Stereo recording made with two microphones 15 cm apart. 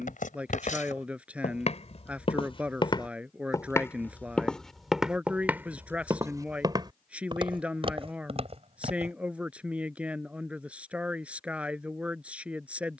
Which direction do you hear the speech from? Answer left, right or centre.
centre.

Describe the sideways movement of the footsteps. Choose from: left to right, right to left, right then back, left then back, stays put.
left to right.